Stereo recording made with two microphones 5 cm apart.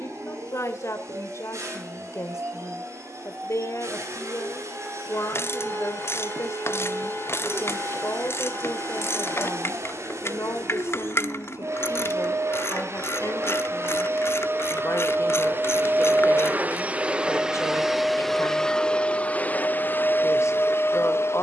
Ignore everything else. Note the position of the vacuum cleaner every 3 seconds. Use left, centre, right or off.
right, right, right, right, right, right, left.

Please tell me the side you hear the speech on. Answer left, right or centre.
left.